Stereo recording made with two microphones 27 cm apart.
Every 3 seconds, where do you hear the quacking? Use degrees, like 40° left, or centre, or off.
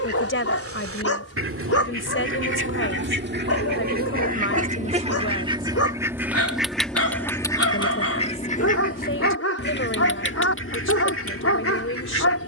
50° right, 30° right, 10° left, 50° left.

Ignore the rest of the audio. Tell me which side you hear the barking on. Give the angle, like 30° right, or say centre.
60° left.